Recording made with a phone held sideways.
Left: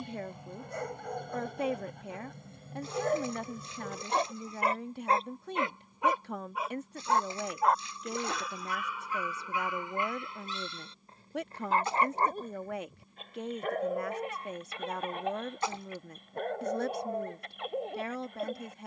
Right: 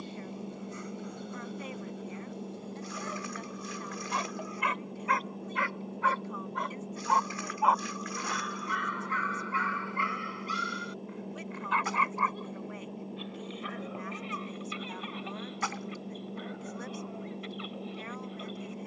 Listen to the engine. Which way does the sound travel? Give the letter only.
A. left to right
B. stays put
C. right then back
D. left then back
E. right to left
B.